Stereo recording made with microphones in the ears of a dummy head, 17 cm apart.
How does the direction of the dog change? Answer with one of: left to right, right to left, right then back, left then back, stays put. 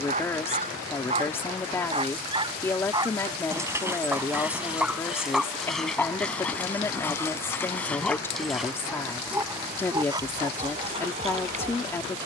left then back.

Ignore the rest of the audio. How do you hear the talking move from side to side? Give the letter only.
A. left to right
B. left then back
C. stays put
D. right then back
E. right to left
C.